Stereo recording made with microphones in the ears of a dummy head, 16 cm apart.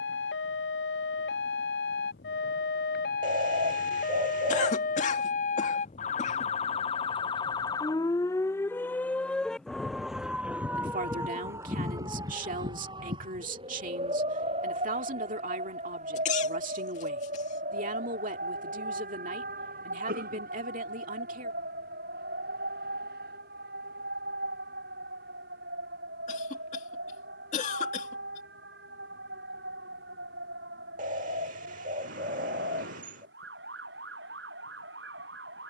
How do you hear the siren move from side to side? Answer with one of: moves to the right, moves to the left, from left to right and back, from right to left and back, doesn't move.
moves to the right.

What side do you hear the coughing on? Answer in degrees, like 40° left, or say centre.
40° left.